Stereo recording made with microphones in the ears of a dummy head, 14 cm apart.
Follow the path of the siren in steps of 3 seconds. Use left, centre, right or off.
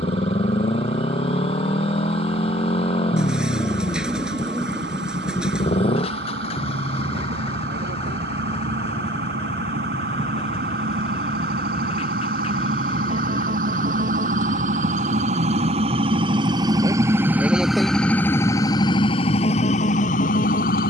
right, right, right, right, right, right, left.